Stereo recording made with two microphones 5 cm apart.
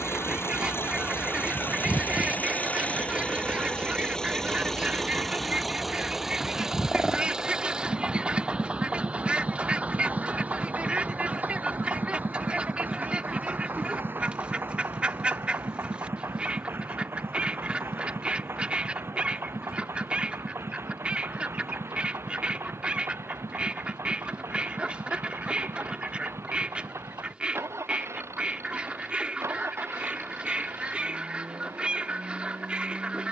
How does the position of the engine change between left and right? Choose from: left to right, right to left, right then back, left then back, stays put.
left to right.